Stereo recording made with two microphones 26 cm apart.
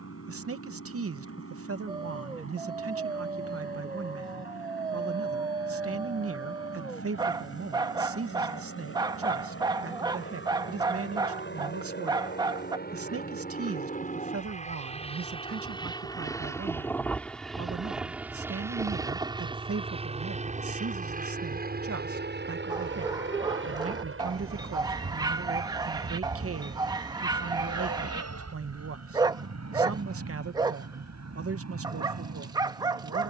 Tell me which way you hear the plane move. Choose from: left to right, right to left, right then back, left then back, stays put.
left to right.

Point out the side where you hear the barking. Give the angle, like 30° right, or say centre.
10° right.